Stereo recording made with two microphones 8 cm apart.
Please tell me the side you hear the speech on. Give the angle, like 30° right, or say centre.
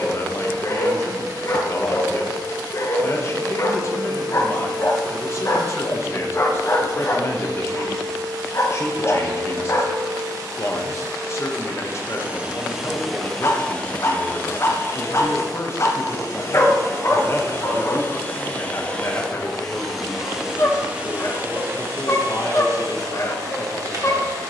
40° left.